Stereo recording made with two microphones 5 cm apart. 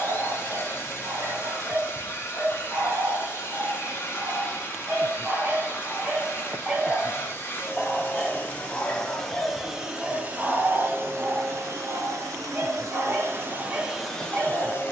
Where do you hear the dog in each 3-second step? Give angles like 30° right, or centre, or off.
40° right, 30° right, centre, 10° right, 30° right.